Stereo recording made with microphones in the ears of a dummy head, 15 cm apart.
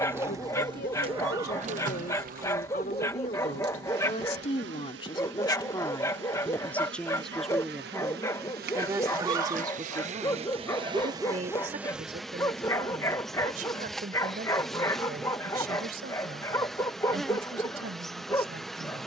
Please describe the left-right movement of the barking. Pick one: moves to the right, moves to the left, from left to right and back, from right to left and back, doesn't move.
doesn't move.